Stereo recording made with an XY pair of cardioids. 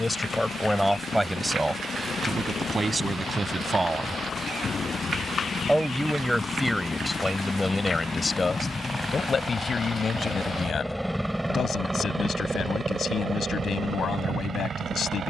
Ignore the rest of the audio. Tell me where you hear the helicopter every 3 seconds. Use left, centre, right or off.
left, left, left, centre, right.